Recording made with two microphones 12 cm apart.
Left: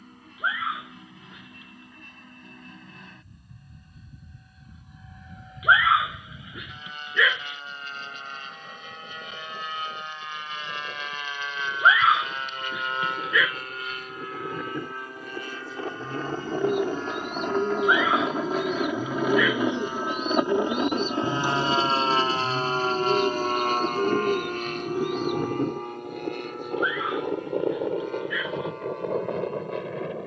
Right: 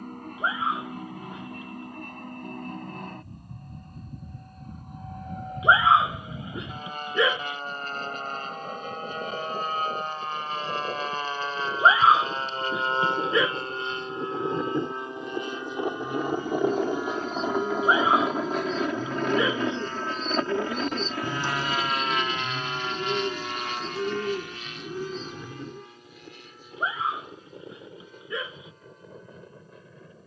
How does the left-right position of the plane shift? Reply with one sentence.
In this clip you hear the plane travel towards the left.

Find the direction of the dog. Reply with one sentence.
In this clip you hear the dog on the right.